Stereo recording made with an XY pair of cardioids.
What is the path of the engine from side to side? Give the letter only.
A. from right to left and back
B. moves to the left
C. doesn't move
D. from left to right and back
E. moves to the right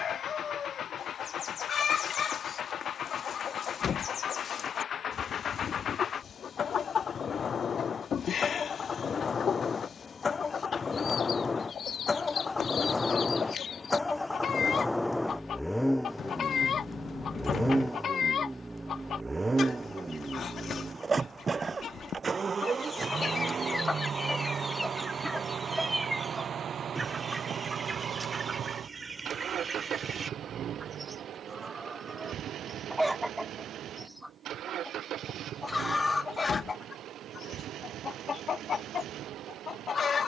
E.